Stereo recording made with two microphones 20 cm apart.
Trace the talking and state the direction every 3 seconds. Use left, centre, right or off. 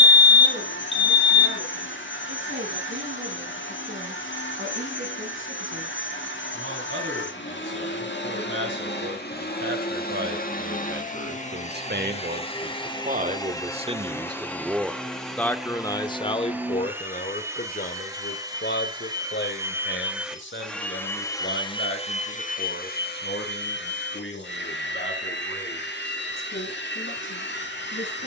right, right, right, right, right, left, left, left, left, left.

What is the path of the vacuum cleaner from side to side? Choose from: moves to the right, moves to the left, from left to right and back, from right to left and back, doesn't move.
from left to right and back.